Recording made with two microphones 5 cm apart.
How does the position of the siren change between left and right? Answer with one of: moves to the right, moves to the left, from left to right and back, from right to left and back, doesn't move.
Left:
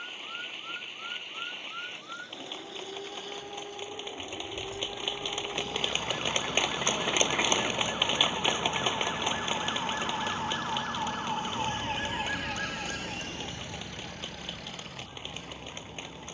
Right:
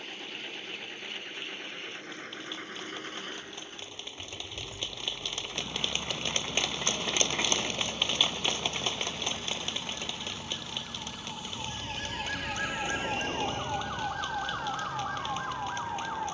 moves to the right.